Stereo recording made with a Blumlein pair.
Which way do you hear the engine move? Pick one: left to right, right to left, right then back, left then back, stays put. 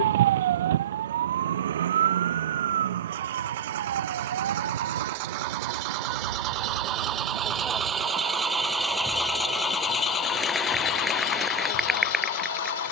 right to left.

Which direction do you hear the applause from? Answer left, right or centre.
centre.